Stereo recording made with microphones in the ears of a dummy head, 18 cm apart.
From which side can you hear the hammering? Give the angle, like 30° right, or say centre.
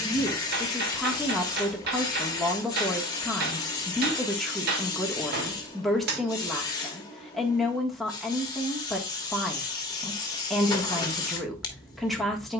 50° right.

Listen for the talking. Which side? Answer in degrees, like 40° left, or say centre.
centre.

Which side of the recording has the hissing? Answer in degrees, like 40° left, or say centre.
20° left.